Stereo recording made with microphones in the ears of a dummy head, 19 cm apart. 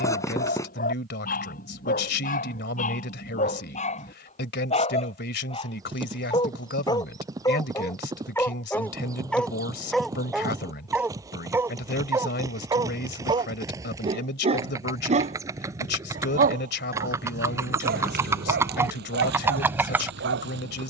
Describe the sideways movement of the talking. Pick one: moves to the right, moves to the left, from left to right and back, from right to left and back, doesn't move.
doesn't move.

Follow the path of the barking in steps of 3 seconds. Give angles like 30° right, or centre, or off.
40° left, 30° left, 20° left, centre, 20° right, 40° right, 50° right.